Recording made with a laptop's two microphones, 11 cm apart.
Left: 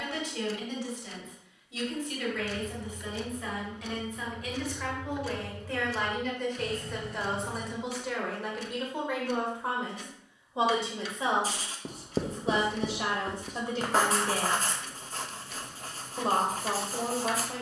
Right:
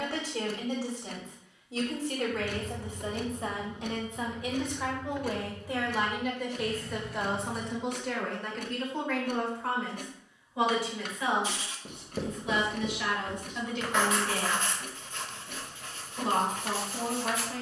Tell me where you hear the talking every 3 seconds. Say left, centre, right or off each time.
right, right, centre, left, left, left.